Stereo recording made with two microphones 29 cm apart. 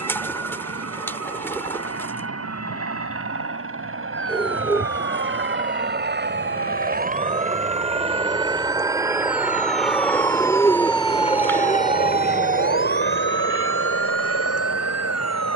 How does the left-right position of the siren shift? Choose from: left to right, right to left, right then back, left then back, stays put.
left to right.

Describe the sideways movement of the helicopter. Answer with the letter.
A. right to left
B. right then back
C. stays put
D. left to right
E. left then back
A.